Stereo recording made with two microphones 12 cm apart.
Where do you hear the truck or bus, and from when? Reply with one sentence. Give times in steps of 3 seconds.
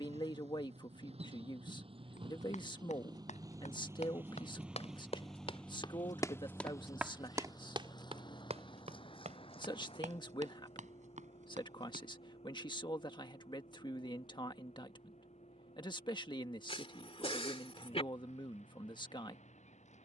In this clip you hear the truck or bus on the right from 0 s, in the centre from 3 s and on the left from 6 s.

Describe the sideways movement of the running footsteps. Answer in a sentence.
You can hear the running footsteps travel towards the right.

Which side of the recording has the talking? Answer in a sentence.
You can hear the talking on the left.